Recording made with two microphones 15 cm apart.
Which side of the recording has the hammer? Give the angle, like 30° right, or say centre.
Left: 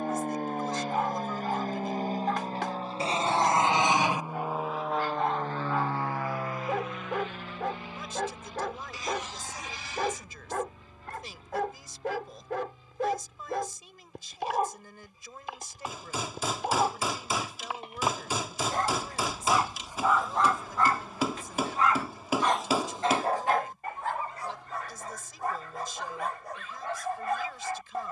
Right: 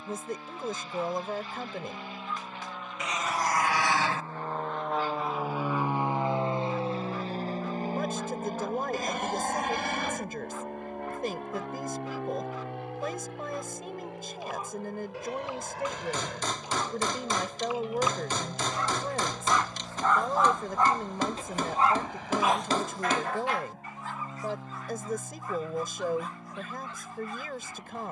10° left.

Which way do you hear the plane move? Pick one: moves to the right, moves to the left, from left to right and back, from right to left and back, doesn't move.
moves to the right.